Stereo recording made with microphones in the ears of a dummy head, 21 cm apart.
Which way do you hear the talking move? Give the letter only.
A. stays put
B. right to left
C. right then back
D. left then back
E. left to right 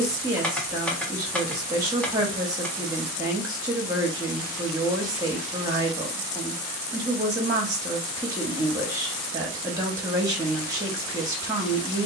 A.